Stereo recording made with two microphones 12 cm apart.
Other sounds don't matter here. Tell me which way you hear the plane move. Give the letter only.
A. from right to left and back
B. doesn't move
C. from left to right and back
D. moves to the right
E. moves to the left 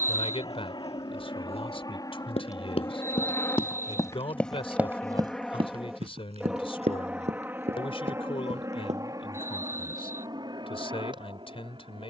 D.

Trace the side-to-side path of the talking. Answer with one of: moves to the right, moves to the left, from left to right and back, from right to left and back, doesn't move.
doesn't move.